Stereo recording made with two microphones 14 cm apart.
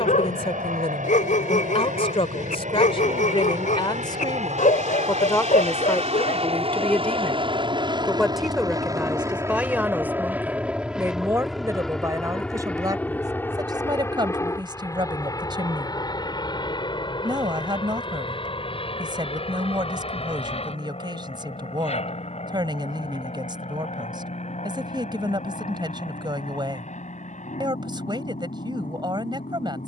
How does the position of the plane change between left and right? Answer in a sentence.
In this clip you hear the plane move from right to left.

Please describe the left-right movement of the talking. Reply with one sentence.
You can hear the talking move from left to right.